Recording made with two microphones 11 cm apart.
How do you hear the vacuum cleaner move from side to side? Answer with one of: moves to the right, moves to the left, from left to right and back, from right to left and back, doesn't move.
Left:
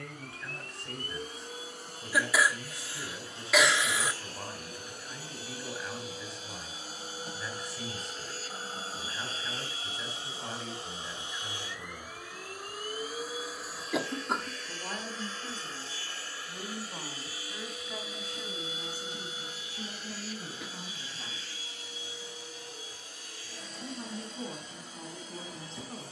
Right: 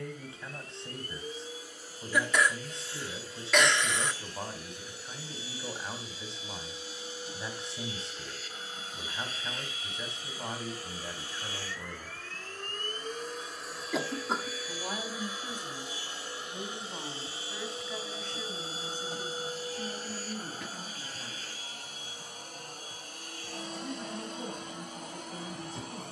moves to the right.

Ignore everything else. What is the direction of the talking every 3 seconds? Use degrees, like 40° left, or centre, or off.
20° right, 20° right, 20° right, 20° right, 20° right, centre, 10° left, 20° left, 30° left.